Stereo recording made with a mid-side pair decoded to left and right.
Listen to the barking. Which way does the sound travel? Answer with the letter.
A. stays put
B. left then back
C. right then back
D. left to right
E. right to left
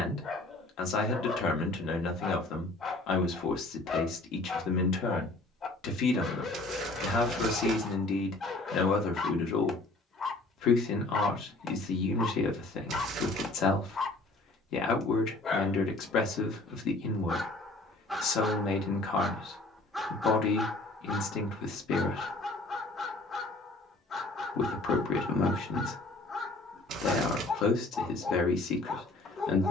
C.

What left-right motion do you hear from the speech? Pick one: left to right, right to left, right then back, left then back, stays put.
stays put.